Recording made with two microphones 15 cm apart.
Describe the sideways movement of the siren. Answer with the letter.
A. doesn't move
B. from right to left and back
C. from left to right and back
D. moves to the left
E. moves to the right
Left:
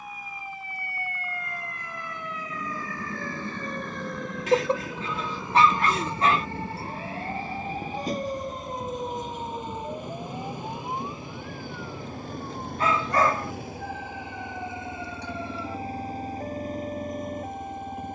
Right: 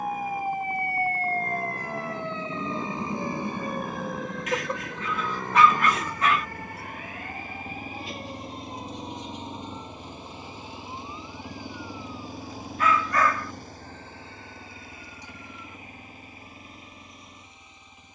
D.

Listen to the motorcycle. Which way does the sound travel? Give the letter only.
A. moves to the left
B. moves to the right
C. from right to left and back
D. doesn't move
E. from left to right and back
A.